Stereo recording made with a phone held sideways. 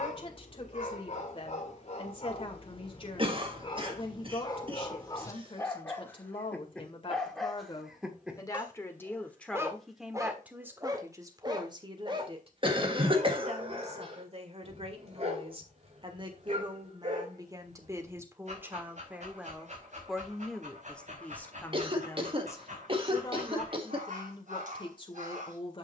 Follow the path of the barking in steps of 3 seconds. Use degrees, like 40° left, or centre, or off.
50° left, 30° left, centre, 20° right, 40° right, 50° right, 60° right, 60° right, 60° right.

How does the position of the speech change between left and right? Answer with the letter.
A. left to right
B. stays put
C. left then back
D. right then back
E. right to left
D.